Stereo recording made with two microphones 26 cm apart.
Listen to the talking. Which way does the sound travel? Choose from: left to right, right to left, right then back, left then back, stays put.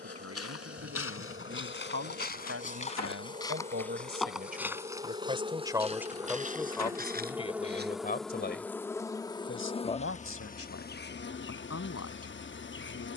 right to left.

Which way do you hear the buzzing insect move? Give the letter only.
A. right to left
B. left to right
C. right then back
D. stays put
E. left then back
A.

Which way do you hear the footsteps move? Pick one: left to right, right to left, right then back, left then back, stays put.
left to right.